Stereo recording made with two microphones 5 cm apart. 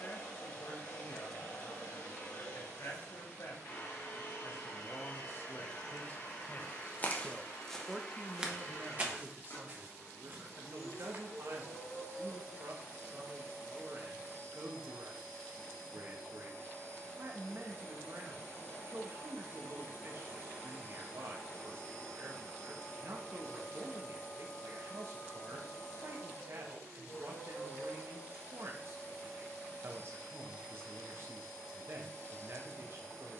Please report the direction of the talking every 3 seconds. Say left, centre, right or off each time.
left, left, centre, right, right, right, right, right, right, right, right.